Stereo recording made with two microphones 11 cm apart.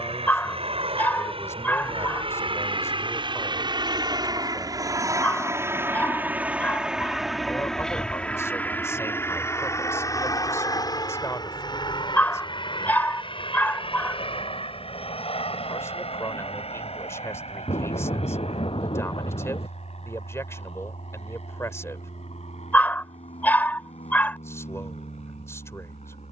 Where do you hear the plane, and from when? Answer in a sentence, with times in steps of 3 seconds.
You can hear the plane on the right from 0 s, in the centre from 6 s and on the left from 9 s.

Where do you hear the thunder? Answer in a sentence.
In this clip you hear the thunder on the left.